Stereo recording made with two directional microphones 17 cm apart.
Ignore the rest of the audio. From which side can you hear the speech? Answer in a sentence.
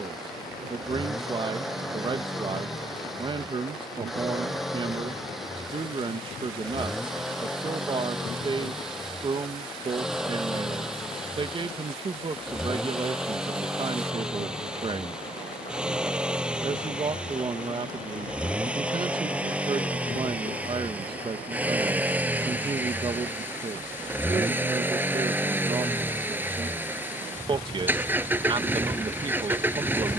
You can hear the speech on the right.